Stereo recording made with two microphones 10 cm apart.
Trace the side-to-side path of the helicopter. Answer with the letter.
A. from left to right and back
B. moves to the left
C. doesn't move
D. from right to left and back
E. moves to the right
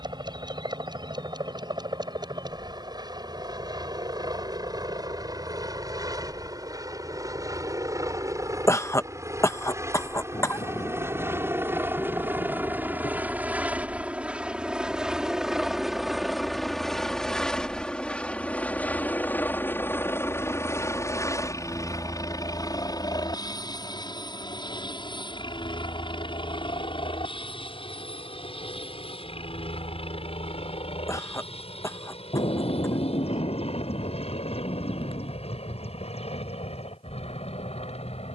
B.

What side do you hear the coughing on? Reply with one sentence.
In this clip you hear the coughing on the left.